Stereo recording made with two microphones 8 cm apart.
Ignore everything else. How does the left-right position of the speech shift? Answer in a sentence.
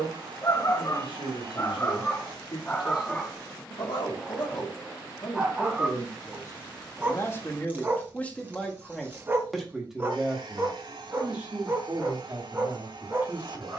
You can hear the speech travel towards the right.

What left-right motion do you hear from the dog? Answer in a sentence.
You can hear the dog move from left to right.